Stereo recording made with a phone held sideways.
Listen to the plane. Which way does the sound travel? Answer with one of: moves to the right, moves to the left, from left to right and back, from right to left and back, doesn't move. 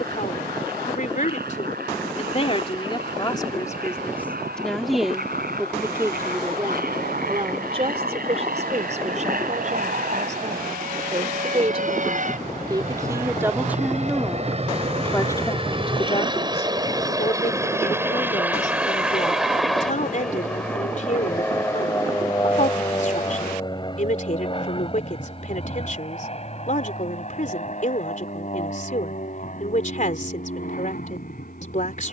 moves to the left.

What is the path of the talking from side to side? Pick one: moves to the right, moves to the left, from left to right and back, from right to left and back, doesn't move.
from left to right and back.